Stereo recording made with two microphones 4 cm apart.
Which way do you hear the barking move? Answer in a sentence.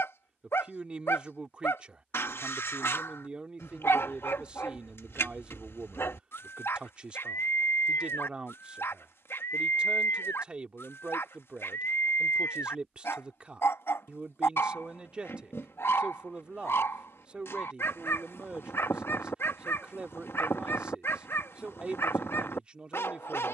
In this clip you hear the barking stay in one place.